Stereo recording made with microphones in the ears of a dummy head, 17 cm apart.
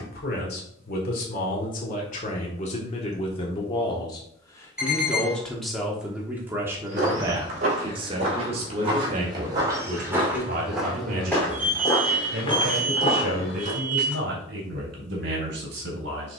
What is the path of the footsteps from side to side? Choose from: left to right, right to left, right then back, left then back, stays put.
right to left.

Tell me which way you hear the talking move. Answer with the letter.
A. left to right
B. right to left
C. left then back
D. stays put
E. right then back
A.